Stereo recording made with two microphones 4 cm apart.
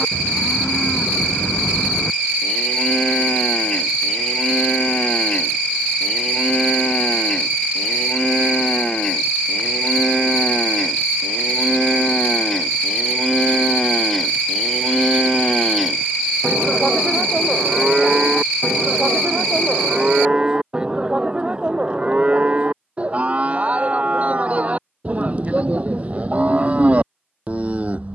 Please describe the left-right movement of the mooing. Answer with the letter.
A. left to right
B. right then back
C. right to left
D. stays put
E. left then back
A.